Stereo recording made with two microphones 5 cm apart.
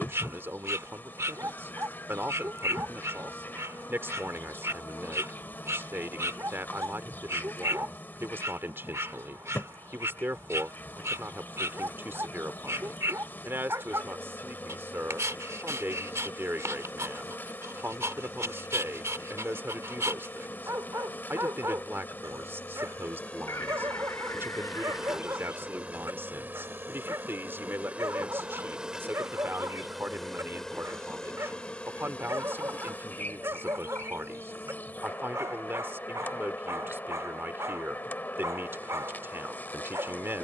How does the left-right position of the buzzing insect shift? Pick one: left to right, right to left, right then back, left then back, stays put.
right then back.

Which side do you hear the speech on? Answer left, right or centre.
right.